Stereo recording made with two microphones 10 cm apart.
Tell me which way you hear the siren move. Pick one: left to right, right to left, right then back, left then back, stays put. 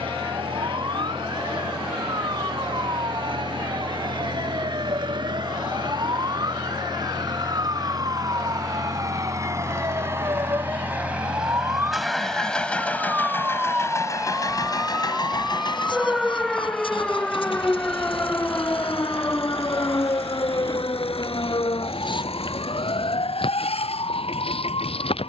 right to left.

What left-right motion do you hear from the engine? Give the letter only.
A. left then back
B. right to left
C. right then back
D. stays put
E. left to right
B.